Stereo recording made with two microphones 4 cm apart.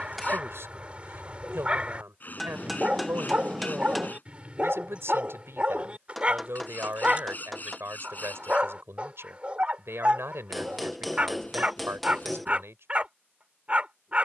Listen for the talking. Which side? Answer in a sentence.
You can hear the talking on the right.